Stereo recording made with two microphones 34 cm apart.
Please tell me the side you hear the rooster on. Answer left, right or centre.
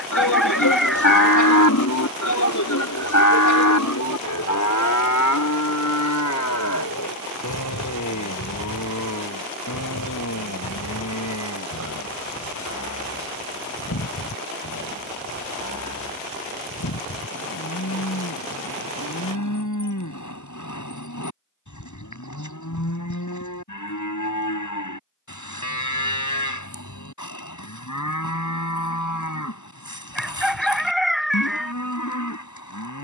centre.